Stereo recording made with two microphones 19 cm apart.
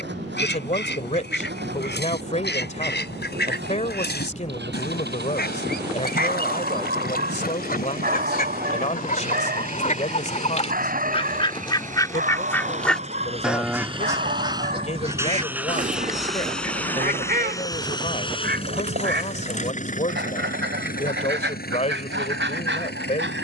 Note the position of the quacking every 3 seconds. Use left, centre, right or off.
left, left, left, left, centre, right, right, right.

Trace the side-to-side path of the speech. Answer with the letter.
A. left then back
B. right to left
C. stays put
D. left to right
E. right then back
C.